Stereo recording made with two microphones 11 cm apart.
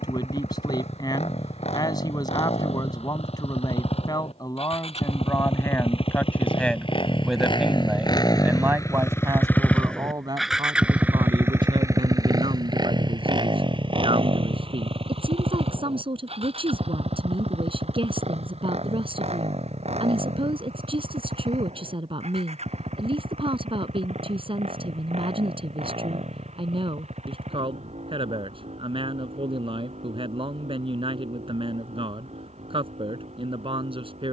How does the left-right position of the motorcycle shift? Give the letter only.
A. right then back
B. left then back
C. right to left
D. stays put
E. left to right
E.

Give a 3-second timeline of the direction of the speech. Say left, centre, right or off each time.
left, left, centre, right, right, right, right, right, right, right, right, right.